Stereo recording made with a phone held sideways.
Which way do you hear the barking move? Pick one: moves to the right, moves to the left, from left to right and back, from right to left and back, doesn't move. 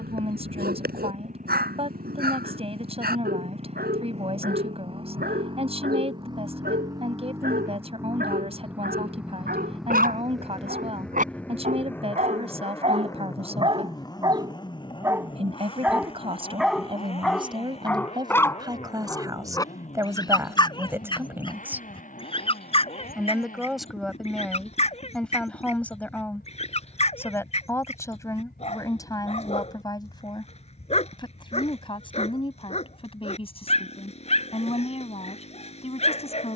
moves to the left.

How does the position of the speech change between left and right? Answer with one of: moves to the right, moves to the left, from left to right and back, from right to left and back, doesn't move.
moves to the left.